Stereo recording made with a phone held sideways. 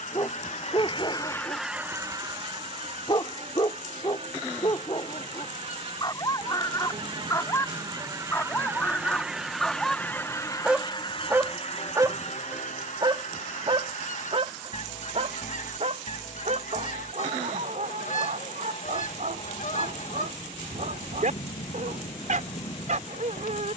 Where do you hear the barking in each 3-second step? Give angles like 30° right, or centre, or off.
40° left, 40° left, 20° left, 10° right, 40° right, 60° right, 70° right, 70° right.